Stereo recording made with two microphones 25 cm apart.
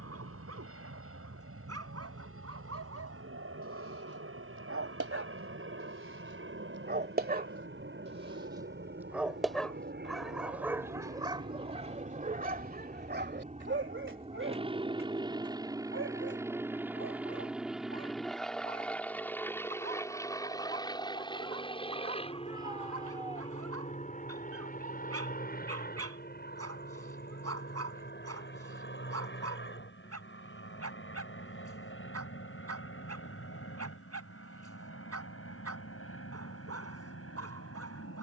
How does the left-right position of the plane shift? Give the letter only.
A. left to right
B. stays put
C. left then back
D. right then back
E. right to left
E.